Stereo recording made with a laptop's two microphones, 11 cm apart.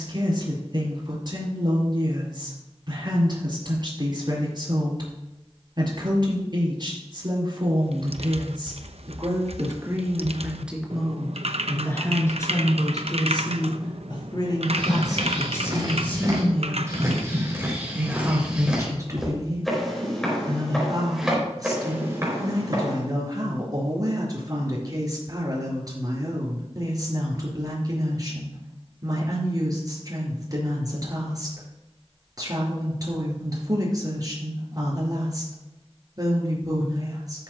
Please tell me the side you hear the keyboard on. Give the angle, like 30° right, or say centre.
70° right.